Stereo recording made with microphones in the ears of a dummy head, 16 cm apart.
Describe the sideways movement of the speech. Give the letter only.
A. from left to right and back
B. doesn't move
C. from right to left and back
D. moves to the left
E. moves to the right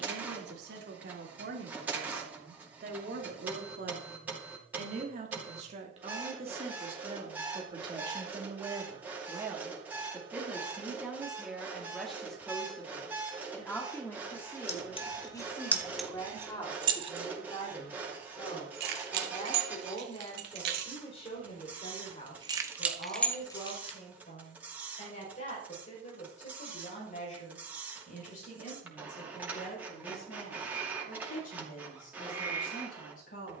D.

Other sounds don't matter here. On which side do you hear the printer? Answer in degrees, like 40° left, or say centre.
10° right.